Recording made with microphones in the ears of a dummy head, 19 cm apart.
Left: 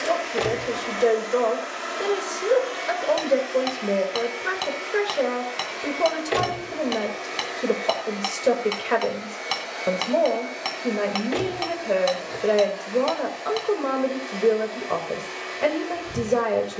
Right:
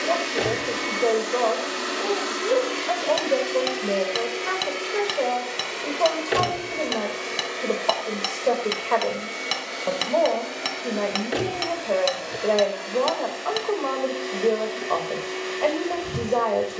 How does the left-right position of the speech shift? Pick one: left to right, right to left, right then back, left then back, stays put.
stays put.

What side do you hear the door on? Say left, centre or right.
centre.